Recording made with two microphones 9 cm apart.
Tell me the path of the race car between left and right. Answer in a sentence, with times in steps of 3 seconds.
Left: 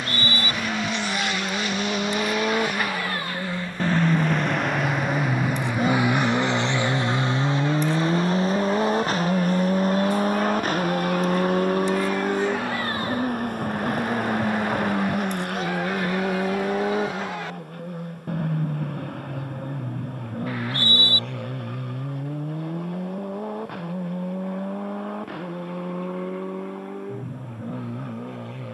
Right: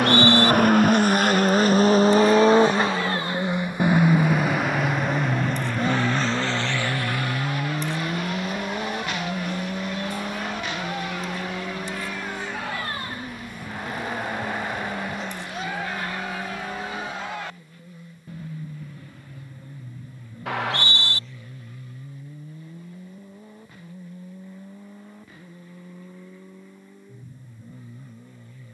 In this clip you hear the race car on the right from 0 s, in the centre from 3 s and on the left from 6 s.